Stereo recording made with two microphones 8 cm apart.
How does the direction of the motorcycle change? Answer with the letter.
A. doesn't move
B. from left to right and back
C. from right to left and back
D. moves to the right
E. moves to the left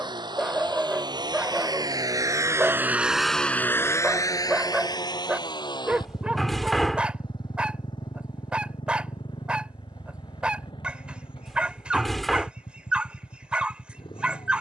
E.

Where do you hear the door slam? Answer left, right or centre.
centre.